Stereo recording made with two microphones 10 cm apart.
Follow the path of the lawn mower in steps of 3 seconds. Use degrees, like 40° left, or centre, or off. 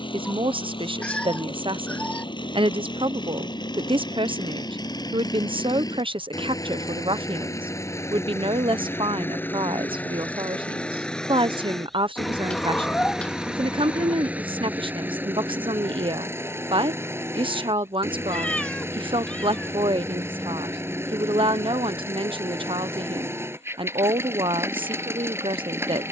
60° left, 50° left, 30° left, 10° left, 10° right, 20° right, 30° right, 30° right, 30° right.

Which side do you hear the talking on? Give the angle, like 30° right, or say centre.
60° right.